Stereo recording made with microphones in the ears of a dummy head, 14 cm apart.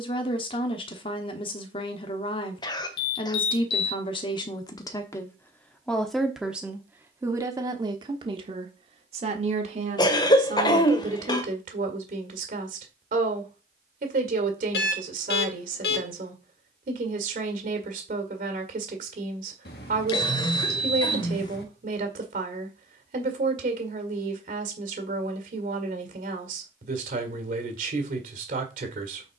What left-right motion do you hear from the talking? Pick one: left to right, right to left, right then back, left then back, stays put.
left to right.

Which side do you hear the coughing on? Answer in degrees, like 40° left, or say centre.
30° left.